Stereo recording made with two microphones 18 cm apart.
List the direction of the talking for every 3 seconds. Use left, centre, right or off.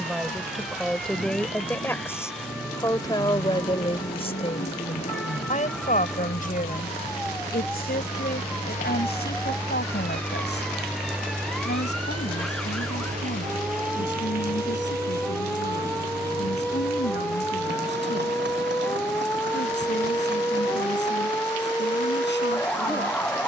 centre, left, left, left, left, left, left, left.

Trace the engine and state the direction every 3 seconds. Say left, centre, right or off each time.
left, left, left, centre, right, right, right, right.